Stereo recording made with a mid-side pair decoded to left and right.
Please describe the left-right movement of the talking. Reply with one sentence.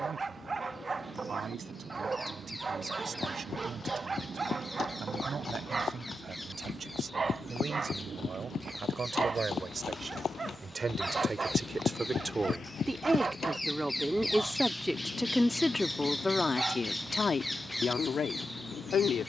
You can hear the talking move to the left.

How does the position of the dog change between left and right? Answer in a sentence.
You can hear the dog stay in one place.